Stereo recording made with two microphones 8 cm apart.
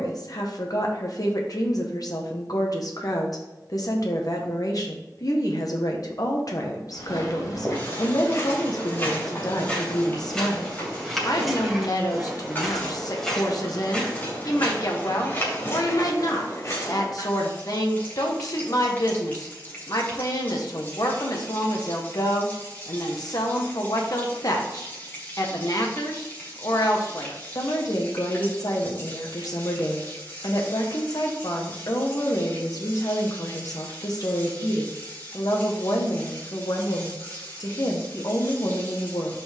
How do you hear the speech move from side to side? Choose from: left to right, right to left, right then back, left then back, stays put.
stays put.